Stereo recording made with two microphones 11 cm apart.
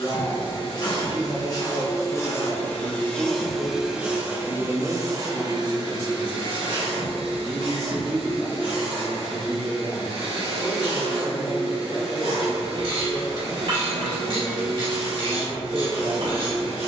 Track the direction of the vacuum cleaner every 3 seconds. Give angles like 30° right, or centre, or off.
30° left, 20° right, 50° right, 50° right, 50° right, 50° right.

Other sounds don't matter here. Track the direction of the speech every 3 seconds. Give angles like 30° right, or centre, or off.
50° right, 40° right, 10° right, 30° right, 40° right, 40° right.